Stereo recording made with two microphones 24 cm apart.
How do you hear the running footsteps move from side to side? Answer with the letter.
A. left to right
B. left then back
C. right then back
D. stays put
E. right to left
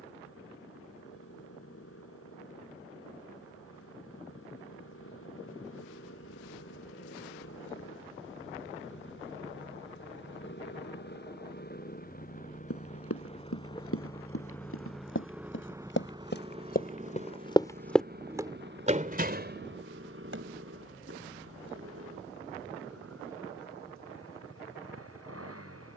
A.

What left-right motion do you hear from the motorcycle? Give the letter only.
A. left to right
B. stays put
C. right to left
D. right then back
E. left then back
A.